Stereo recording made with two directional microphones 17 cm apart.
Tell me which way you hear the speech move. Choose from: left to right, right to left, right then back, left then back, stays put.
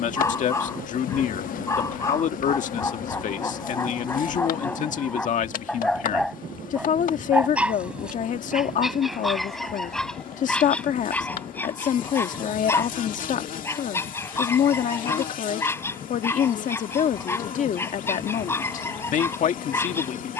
stays put.